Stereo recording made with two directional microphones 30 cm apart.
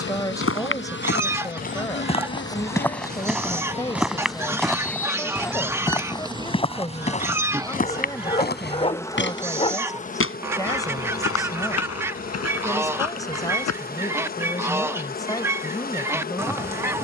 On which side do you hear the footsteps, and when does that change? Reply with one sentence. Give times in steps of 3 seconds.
You can hear the footsteps on the left from 0 s, in the centre from 3 s, on the left from 6 s and not at all from 15 s.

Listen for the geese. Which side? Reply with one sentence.
You can hear the geese in the centre.